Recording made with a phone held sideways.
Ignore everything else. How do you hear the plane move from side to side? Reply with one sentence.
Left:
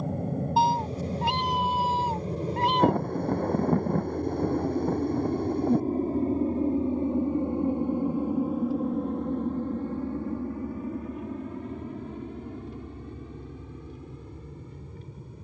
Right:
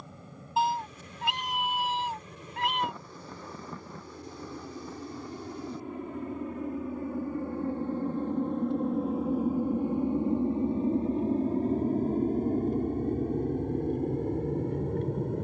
You can hear the plane travel towards the right.